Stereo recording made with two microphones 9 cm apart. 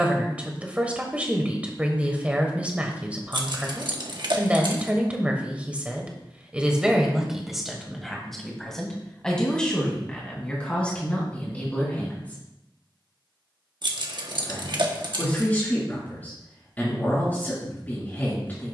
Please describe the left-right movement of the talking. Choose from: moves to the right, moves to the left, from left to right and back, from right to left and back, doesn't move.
moves to the left.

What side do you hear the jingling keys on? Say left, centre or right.
right.